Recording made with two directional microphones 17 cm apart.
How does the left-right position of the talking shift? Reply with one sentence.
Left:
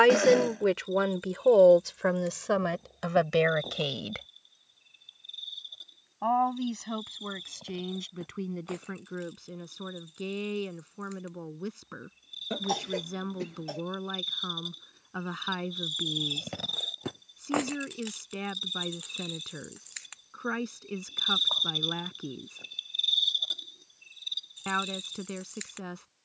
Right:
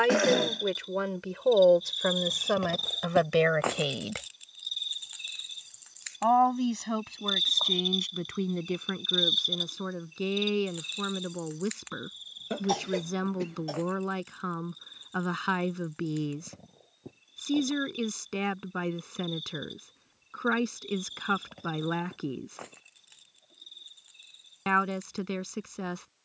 In this clip you hear the talking travel towards the right.